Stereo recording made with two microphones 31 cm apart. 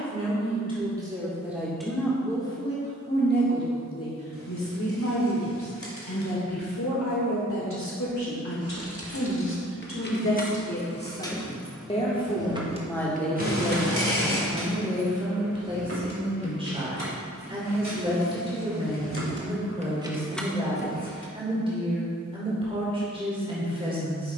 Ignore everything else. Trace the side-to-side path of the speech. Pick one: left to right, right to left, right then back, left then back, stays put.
left then back.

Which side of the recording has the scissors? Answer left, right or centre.
left.